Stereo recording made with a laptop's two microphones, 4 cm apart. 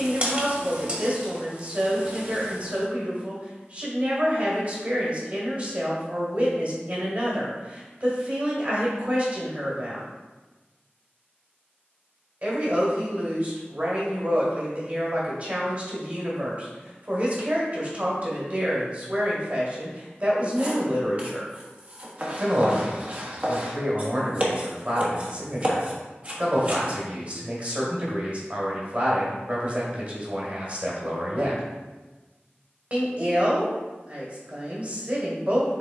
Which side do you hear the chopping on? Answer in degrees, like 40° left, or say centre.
30° right.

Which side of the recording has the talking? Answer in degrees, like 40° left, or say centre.
40° right.